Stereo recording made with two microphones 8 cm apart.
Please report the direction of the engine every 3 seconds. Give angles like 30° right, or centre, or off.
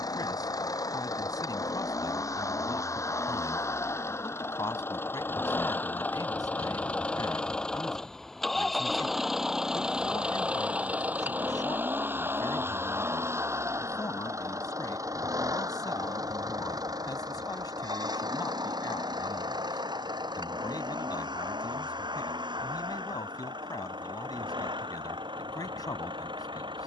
40° left, 30° left, 10° left, 10° right, 30° right, 50° right, 60° right, 60° right, 70° right.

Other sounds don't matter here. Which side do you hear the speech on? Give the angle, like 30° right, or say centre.
50° left.